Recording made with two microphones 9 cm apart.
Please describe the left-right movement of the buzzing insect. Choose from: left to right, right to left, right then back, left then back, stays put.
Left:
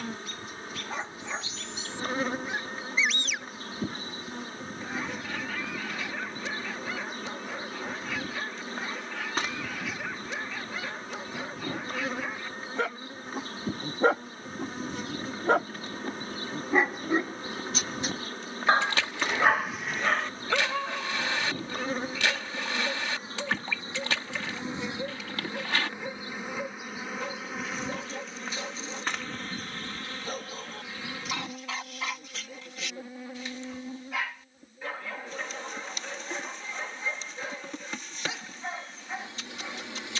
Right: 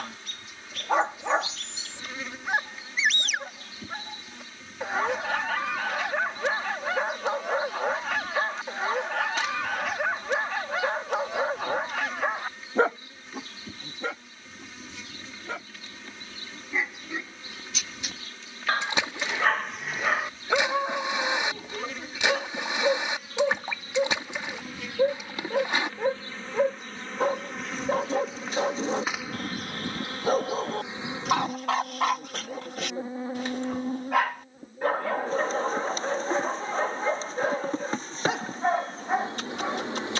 left to right.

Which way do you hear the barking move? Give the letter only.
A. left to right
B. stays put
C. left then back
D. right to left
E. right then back
C.